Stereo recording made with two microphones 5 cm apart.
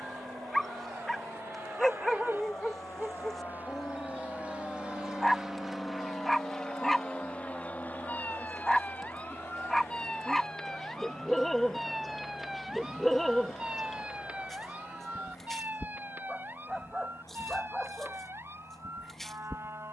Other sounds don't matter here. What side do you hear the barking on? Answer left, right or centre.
centre.